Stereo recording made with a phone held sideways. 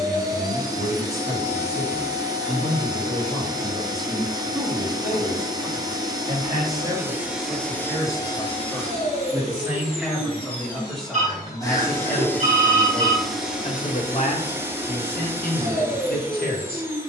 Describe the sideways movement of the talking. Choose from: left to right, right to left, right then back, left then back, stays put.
right then back.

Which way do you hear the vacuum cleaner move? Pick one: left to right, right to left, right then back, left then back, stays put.
left then back.